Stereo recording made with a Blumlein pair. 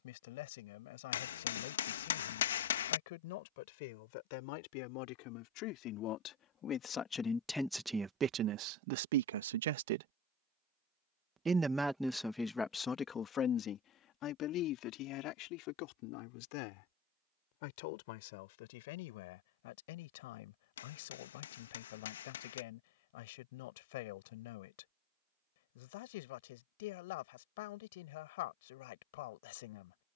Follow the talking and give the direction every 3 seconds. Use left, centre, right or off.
left, left, centre, right, left, left, left, left, left, left.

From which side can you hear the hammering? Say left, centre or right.
left.